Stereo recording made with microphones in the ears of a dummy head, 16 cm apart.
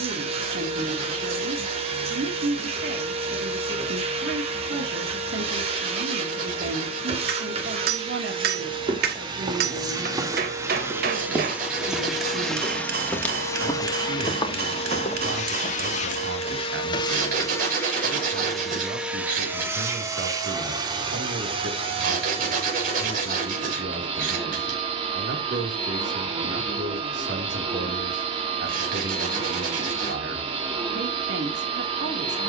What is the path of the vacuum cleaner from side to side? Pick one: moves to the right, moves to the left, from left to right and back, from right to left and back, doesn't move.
from right to left and back.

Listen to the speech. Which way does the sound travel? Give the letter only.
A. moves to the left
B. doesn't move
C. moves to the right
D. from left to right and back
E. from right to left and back
B.